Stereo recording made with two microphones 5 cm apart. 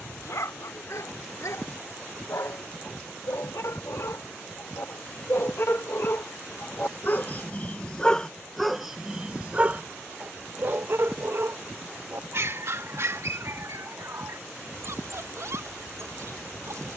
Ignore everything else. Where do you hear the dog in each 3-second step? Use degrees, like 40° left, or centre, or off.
80° left, 70° left, 30° left, 40° right, 60° right, 70° right.